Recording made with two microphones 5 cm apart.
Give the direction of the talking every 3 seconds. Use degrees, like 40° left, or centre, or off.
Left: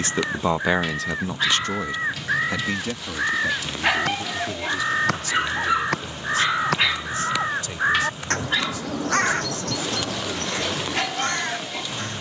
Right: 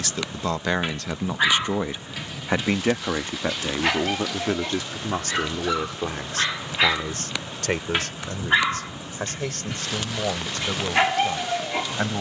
10° right, 50° right, 60° right, 60° right.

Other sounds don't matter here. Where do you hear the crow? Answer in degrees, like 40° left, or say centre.
80° left.